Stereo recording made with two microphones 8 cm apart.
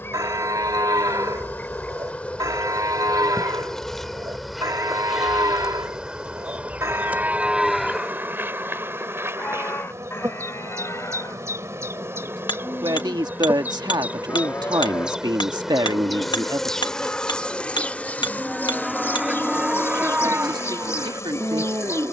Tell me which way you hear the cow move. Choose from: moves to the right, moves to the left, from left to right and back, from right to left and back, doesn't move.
from right to left and back.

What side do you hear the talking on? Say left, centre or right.
right.